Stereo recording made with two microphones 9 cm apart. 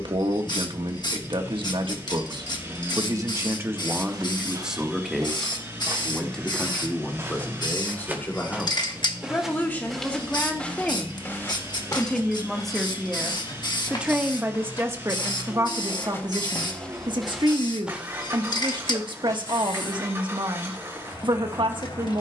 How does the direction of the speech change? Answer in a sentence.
In this clip you hear the speech go left and come back.